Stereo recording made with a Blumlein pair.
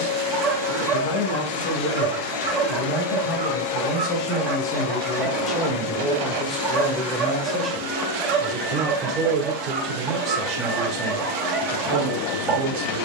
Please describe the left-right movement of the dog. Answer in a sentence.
You can hear the dog stay put.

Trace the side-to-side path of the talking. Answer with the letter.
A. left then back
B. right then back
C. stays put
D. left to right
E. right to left
D.